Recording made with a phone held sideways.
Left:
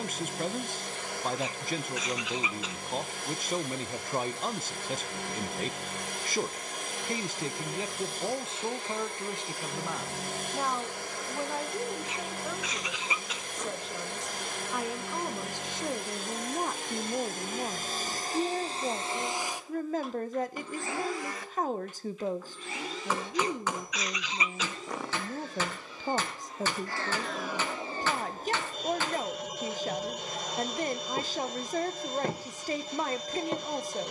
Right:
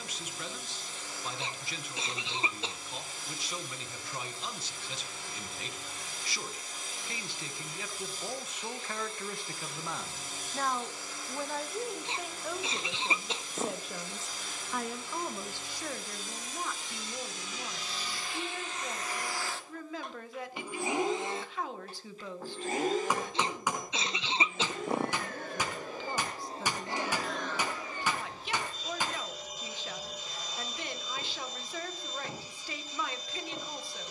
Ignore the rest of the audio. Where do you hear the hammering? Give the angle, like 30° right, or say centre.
10° right.